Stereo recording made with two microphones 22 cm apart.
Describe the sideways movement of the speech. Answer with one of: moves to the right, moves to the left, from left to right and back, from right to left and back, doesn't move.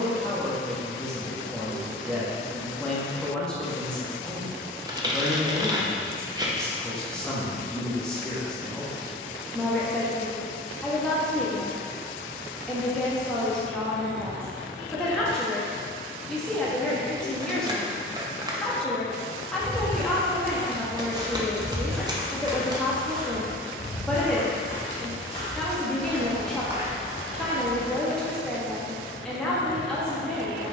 doesn't move.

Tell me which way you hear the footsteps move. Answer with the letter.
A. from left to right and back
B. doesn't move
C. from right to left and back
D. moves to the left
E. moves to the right
C.